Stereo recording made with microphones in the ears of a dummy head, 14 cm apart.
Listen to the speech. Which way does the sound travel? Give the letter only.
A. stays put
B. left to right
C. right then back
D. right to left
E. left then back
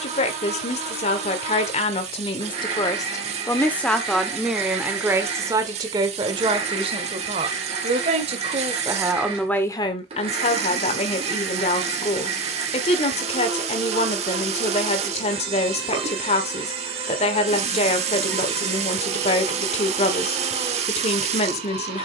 C.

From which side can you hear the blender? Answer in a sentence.
You can hear the blender on the right.